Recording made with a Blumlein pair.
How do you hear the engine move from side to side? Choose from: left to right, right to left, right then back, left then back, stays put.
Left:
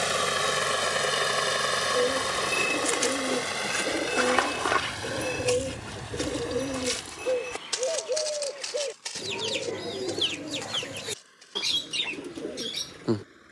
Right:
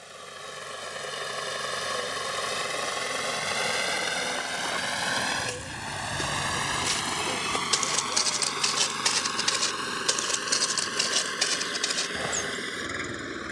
left to right.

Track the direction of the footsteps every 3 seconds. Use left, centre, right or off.
left, left, centre, right, right.